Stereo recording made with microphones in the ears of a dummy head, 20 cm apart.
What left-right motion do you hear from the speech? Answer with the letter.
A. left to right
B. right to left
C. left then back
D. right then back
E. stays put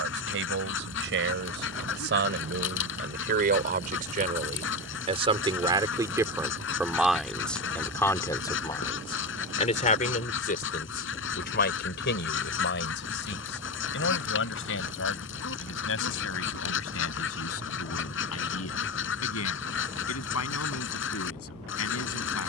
B.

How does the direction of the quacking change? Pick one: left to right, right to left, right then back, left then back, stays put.
stays put.